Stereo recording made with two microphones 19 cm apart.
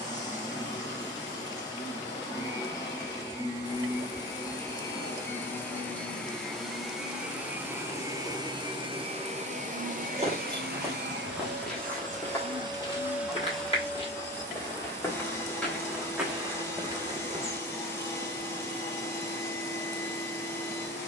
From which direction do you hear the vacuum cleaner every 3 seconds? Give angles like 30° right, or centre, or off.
20° left, 20° left, 10° right, 50° right, 10° right, 10° left, 10° left.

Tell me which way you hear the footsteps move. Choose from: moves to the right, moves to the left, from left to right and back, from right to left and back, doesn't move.
from right to left and back.